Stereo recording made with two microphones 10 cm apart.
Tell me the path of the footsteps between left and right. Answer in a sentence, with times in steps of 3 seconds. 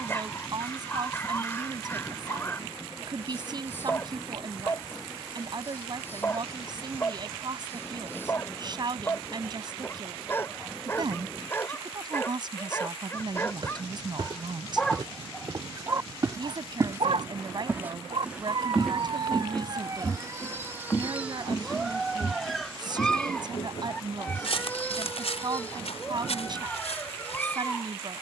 In this clip you hear the footsteps not at all from 0 s, on the right from 12 s, in the centre from 18 s and on the left from 21 s.